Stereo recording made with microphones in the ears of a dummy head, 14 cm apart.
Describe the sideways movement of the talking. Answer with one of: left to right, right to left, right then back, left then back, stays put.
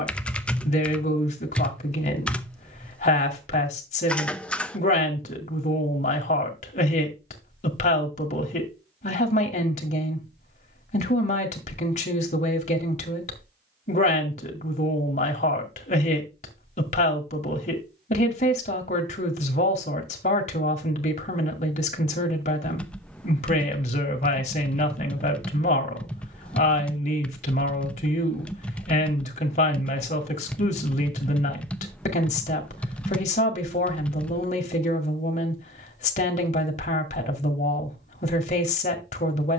stays put.